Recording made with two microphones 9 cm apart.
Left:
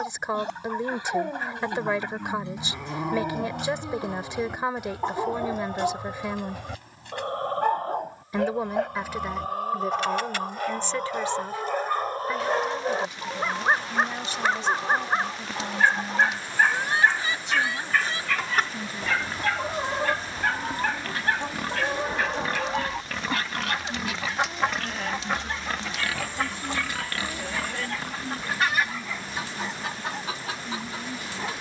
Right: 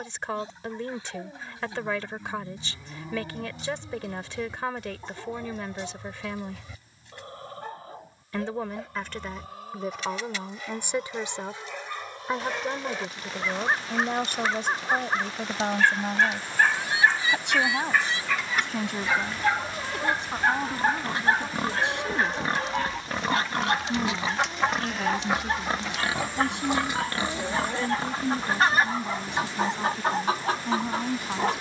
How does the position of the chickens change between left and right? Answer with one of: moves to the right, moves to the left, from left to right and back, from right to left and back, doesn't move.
moves to the right.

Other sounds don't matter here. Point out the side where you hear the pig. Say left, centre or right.
right.